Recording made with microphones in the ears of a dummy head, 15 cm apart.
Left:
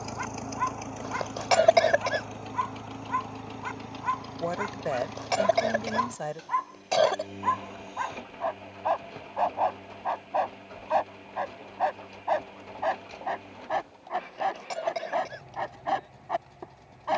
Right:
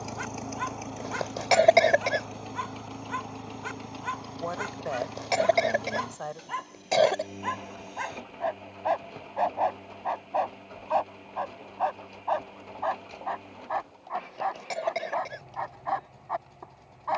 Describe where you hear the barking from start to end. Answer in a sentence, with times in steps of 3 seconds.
In this clip you hear the barking on the right from 0 s, in the centre from 9 s and on the left from 12 s.